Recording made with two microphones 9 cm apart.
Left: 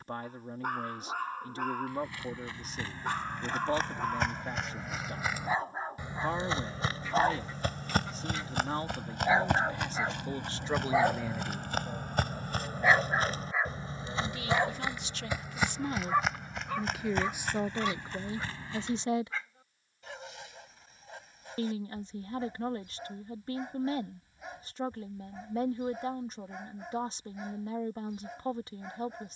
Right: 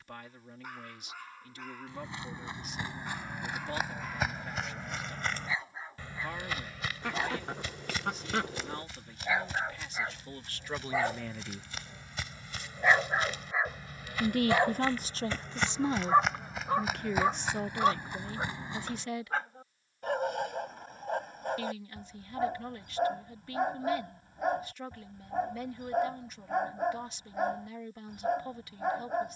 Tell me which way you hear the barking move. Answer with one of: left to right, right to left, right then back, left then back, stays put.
left to right.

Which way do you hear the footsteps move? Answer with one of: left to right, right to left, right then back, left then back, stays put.
left then back.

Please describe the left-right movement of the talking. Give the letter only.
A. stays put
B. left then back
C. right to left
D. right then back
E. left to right
D.